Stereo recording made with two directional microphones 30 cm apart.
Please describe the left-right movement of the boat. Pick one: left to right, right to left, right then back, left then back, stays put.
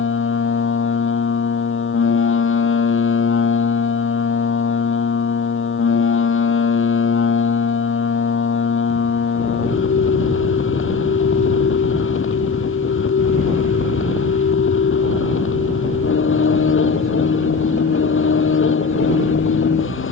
stays put.